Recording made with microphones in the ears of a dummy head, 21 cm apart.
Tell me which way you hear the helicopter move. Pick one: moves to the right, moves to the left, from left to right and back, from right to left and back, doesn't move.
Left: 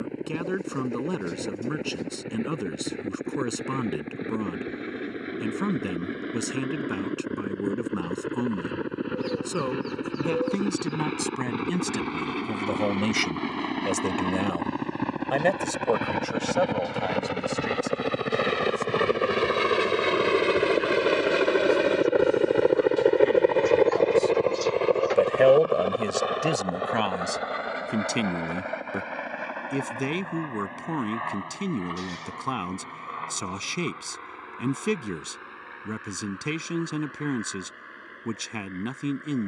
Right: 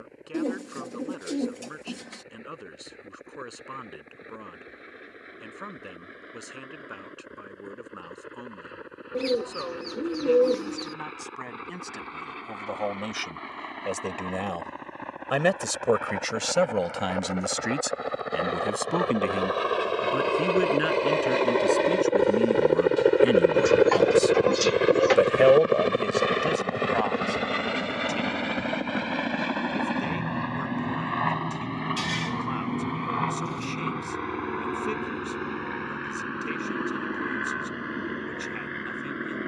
moves to the right.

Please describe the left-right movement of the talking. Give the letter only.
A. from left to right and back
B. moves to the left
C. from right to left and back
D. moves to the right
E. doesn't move
A.